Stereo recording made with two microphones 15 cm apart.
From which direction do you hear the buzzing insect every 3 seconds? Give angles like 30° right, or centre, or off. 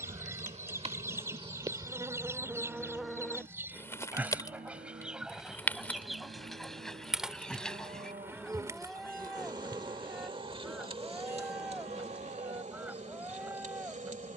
30° right, 10° left, 10° right, 40° right, 50° right.